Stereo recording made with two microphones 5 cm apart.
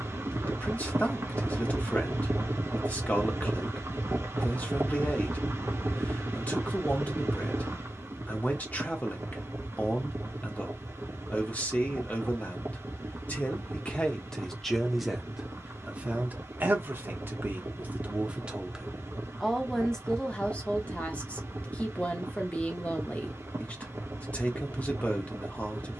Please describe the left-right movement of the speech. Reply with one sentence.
In this clip you hear the speech move from left to right and back again.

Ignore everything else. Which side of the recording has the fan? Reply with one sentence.
You can hear the fan on the right.